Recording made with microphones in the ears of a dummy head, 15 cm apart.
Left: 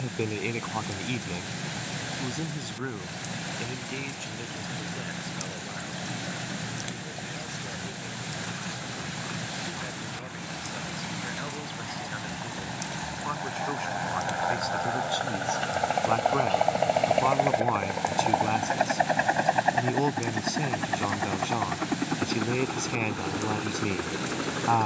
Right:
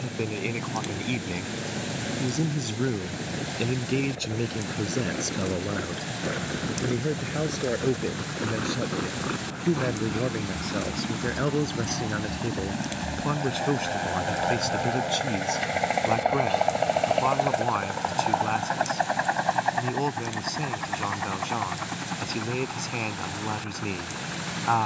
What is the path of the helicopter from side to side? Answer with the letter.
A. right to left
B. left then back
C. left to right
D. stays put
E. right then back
A.